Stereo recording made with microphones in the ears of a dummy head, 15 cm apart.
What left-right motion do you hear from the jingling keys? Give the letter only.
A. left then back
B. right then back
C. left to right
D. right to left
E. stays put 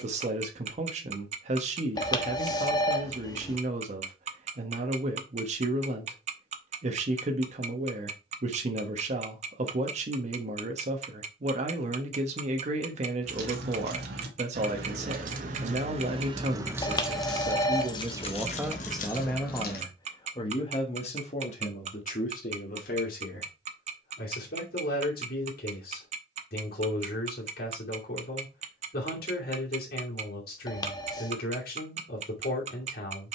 D.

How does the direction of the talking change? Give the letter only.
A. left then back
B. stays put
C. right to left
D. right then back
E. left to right
C.